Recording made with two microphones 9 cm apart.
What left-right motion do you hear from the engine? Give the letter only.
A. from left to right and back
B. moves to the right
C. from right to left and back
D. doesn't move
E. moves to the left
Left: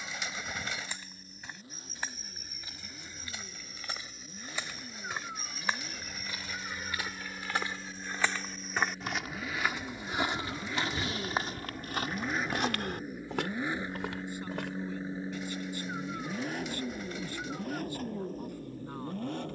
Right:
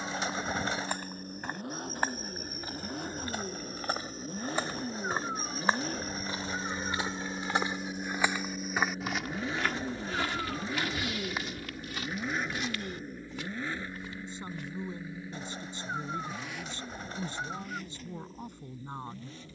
E.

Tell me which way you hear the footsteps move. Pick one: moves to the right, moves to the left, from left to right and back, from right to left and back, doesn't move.
moves to the left.